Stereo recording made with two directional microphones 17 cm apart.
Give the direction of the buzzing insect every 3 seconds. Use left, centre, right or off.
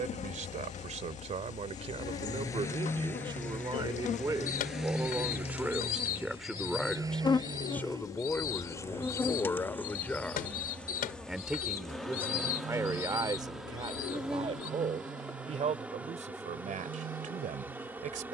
left, left, left, centre, centre, centre.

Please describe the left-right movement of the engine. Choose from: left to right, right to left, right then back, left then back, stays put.
left to right.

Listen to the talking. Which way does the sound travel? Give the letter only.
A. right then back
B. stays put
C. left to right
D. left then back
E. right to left
D.